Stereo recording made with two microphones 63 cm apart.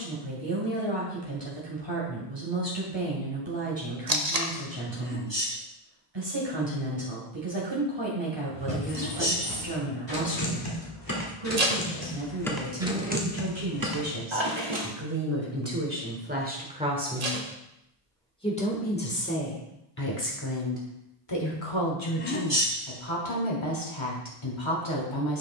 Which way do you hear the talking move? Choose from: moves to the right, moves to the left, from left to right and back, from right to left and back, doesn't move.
moves to the left.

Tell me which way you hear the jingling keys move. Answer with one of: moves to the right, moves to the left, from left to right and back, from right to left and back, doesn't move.
moves to the right.